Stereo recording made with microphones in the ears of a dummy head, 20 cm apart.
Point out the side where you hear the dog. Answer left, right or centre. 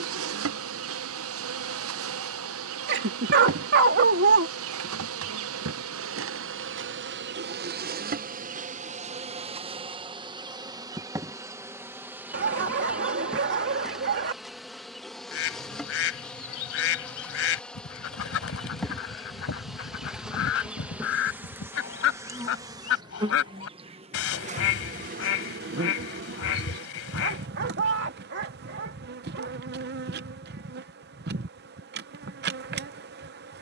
right.